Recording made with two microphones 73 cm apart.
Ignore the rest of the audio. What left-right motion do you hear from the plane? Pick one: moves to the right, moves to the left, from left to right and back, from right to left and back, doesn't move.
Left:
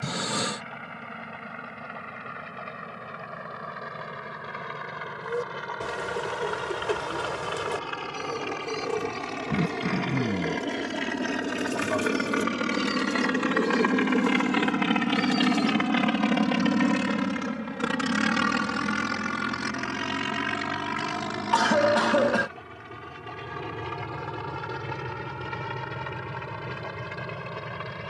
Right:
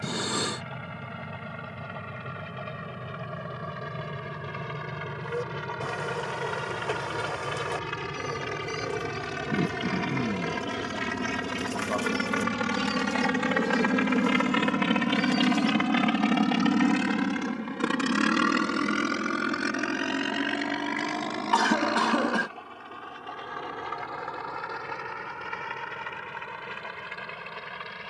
moves to the left.